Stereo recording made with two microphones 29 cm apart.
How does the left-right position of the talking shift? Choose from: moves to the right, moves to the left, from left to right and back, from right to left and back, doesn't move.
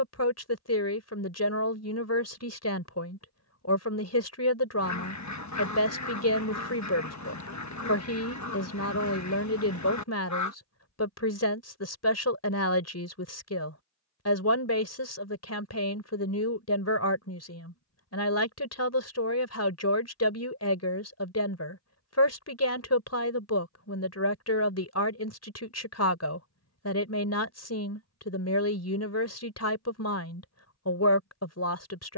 doesn't move.